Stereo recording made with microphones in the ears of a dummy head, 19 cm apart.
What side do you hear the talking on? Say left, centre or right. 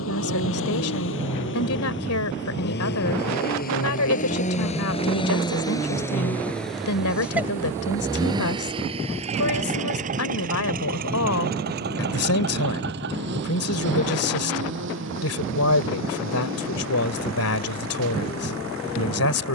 left.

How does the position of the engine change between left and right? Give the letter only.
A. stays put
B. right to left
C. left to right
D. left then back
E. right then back
C.